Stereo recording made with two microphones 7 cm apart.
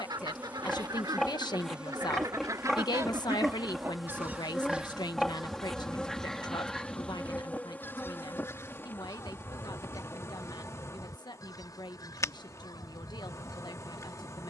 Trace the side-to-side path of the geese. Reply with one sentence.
You can hear the geese move to the left.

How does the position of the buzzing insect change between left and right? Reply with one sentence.
In this clip you hear the buzzing insect travel towards the left.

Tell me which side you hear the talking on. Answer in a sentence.
You can hear the talking on the left.